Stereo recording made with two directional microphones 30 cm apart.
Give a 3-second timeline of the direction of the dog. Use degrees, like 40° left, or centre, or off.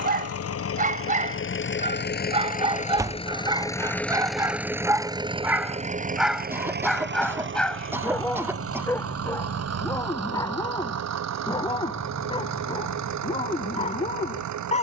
20° right, 10° right, centre, 10° left, 20° left.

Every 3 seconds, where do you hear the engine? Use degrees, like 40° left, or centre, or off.
40° left, centre, 40° right, 60° right, 60° right.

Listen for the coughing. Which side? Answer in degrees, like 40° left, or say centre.
10° right.